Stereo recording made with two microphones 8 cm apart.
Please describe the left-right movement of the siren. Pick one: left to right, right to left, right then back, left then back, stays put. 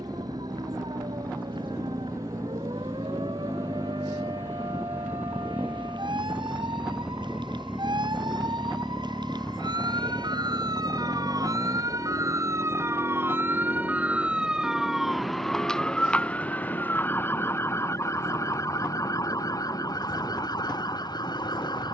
right to left.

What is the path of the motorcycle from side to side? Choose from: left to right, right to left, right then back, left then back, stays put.
right to left.